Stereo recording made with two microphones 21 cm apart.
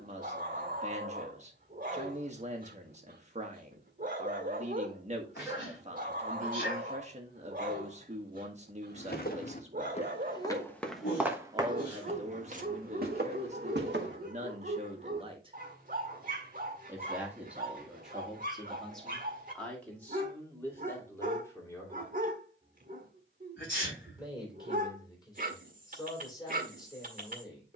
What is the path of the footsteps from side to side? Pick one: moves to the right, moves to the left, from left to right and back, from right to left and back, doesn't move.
moves to the right.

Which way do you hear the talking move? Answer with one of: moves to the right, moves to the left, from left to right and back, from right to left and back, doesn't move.
moves to the left.